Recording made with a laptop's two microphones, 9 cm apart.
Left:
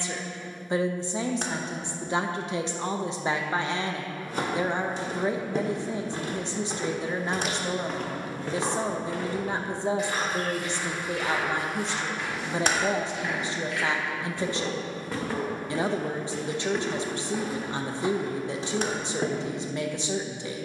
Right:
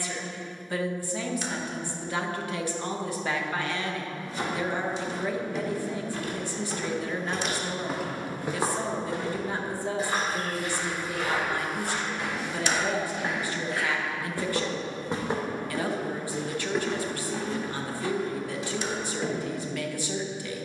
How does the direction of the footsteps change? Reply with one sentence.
In this clip you hear the footsteps go right and come back.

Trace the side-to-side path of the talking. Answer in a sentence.
You can hear the talking stay in one place.